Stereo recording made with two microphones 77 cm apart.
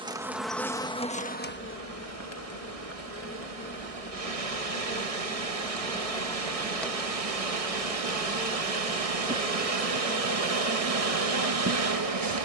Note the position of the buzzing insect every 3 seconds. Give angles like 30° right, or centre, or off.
10° left, 10° left, centre, 20° right.